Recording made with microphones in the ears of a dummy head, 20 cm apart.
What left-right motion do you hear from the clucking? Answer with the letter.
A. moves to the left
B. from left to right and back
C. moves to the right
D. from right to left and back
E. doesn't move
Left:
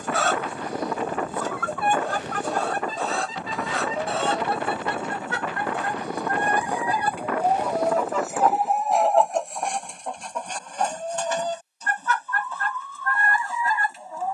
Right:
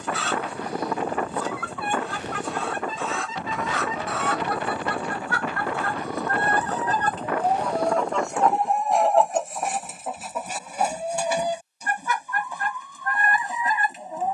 C.